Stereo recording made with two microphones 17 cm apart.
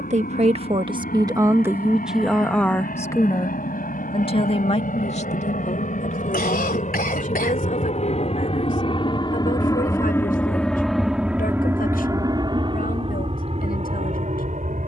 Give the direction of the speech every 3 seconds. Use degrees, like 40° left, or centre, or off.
20° right, 40° left, 60° left, 60° left, 70° left.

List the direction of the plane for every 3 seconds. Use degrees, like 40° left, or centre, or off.
80° left, 70° left, 50° left, 10° left, 40° right.